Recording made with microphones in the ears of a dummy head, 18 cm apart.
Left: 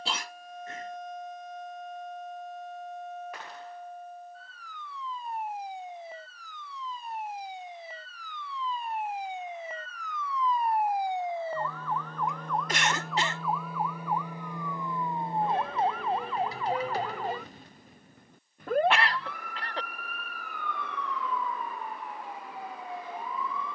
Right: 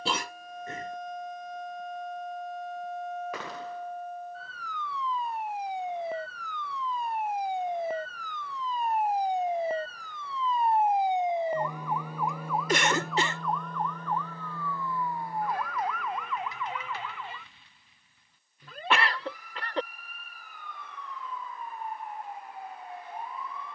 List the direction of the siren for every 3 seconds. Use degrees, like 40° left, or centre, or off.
70° right, 60° right, 40° right, 20° right, centre, 30° left, 40° left, 50° left.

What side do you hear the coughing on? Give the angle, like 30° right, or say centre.
70° right.